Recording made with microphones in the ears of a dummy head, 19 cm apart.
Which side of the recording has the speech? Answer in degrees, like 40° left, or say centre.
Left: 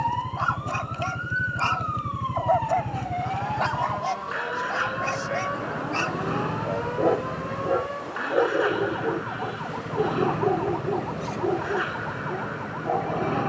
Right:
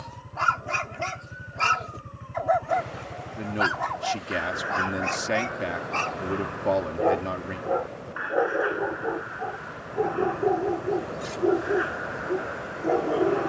70° right.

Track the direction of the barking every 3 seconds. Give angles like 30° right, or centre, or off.
20° right, centre, 20° left, centre, 40° right.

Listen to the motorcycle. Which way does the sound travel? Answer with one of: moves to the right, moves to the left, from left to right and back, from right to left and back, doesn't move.
doesn't move.